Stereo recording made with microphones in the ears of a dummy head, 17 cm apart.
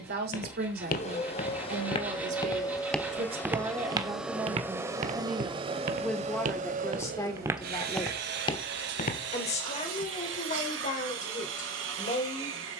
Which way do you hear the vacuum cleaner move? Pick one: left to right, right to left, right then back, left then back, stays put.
left to right.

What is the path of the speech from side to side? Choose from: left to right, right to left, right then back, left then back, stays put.
right to left.